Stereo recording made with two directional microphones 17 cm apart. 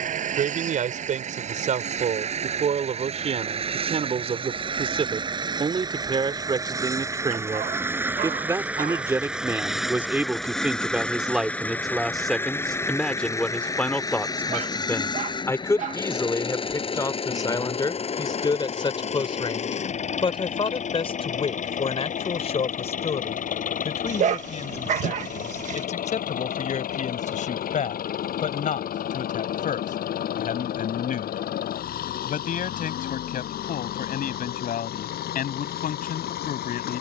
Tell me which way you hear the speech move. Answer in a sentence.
In this clip you hear the speech go from the right side to the left.